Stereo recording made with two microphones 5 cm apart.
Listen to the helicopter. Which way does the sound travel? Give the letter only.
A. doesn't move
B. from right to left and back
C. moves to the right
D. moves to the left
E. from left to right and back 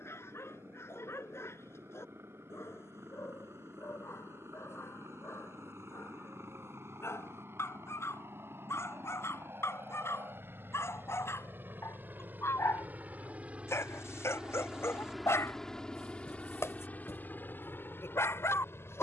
D.